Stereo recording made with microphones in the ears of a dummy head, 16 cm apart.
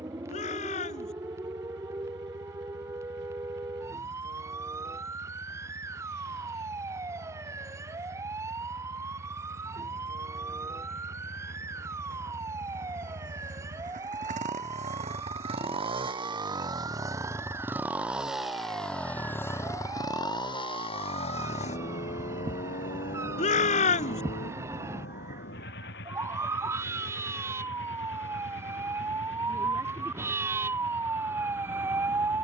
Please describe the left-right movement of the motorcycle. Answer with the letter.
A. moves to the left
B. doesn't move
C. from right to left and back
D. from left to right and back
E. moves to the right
A.